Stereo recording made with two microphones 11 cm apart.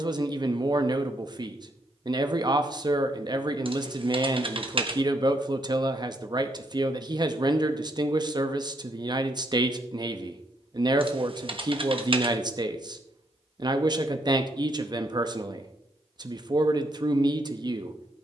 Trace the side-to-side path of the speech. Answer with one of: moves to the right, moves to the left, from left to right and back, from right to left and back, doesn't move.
doesn't move.